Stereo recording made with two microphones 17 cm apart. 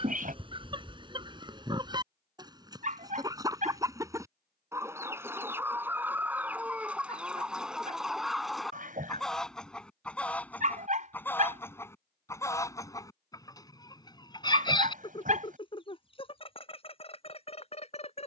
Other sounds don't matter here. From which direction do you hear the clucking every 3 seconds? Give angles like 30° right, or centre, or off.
30° right, 20° right, 10° right, 10° left, 20° left, 30° left.